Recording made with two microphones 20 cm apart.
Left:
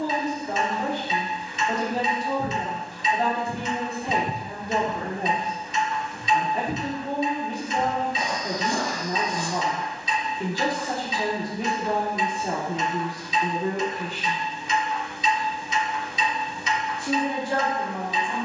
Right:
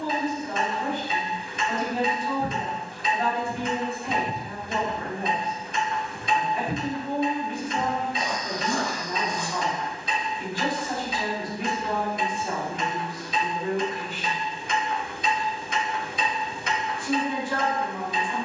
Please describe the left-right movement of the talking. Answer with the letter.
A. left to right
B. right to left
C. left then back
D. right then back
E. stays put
E.